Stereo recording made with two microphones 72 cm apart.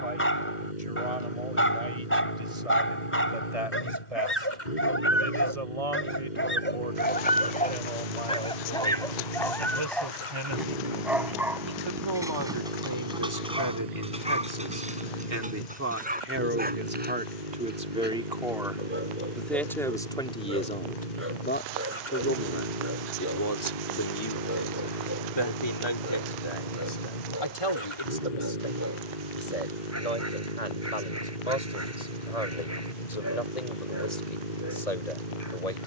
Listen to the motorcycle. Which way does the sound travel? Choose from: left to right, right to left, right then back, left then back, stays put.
stays put.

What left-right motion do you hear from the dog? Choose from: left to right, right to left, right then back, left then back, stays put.
left to right.